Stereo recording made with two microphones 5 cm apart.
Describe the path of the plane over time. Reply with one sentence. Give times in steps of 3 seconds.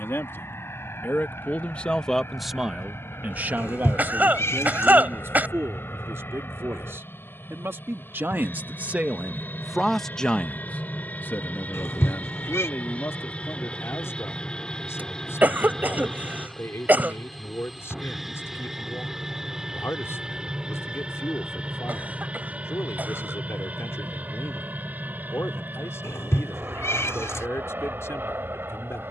You can hear the plane on the left from 0 s, in the centre from 15 s and on the right from 21 s.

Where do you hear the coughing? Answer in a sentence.
You can hear the coughing on the right.